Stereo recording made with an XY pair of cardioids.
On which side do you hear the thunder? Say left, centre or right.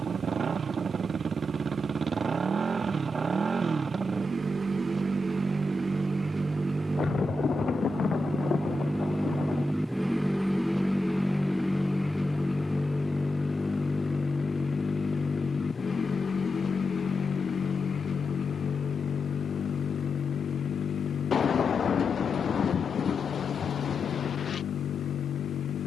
left.